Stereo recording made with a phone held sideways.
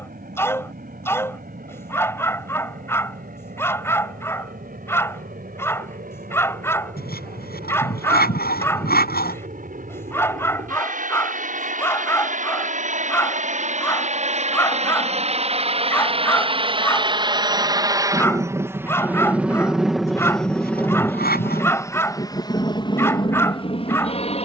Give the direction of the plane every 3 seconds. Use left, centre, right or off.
right, right, right, right, right, right, centre, left.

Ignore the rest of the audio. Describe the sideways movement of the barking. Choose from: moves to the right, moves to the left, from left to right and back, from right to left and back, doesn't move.
doesn't move.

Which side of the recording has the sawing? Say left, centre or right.
left.